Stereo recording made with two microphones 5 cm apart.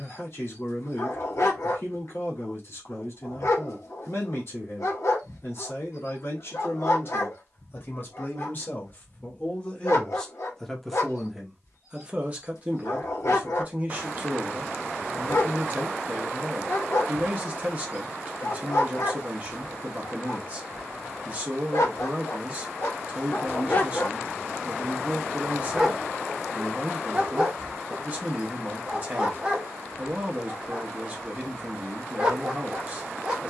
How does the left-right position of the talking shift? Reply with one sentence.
You can hear the talking go from the left side to the right.